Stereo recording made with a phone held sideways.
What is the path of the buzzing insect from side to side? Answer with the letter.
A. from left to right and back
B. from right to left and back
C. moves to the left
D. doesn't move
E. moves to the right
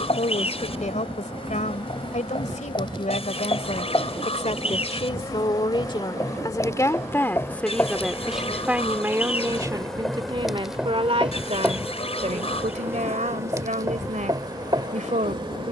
E.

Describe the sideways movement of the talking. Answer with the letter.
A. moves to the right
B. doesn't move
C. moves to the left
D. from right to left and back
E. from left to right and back
A.